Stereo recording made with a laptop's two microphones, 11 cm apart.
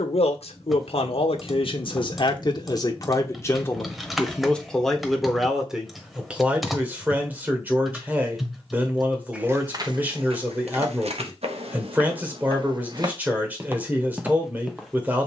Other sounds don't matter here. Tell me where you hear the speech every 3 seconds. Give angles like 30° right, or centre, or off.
50° left, 10° left, 10° right, 20° right, 20° right.